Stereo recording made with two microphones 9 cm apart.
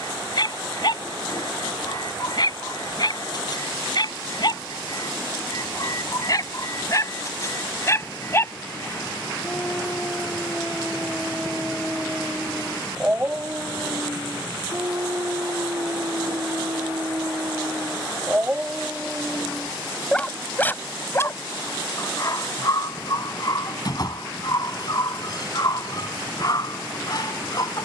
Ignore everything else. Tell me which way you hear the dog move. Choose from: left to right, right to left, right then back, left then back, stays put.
right then back.